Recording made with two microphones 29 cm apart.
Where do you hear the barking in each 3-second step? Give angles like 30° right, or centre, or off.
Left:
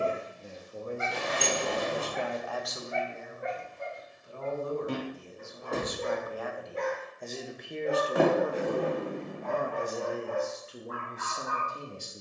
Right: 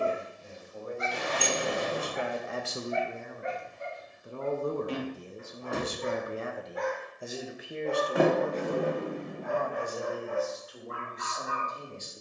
70° left, 50° left, 20° left, 20° right.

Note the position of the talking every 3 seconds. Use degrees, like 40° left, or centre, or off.
10° left, 50° right, 10° right, 30° left.